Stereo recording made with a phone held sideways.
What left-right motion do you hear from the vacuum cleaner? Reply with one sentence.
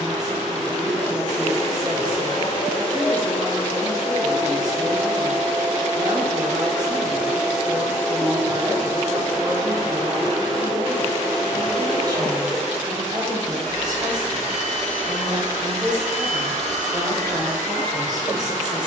You can hear the vacuum cleaner move from left to right.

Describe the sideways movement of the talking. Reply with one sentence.
You can hear the talking stay put.